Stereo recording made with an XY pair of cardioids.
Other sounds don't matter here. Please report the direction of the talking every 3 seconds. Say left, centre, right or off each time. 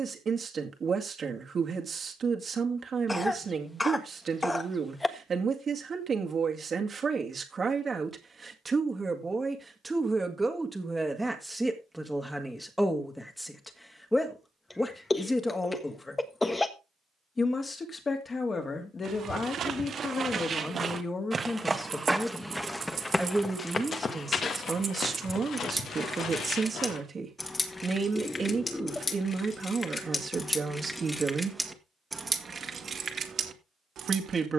right, right, right, centre, centre, left, left, centre, right, right, right, right.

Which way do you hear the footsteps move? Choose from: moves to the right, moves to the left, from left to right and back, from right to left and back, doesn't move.
moves to the left.